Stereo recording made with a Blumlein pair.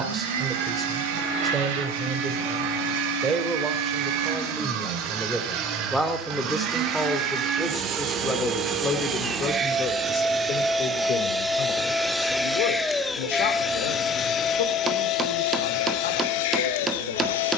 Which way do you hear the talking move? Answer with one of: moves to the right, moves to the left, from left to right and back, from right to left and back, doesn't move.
moves to the left.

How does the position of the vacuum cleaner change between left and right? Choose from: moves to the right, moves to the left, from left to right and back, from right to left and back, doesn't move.
moves to the left.